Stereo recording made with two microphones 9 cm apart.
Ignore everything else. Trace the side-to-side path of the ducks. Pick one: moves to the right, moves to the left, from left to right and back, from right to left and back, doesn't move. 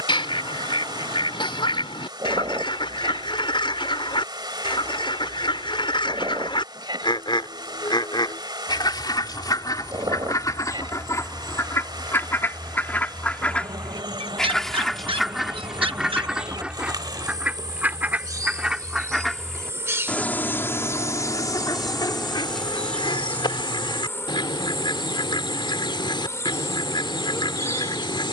from left to right and back.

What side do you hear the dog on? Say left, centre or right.
right.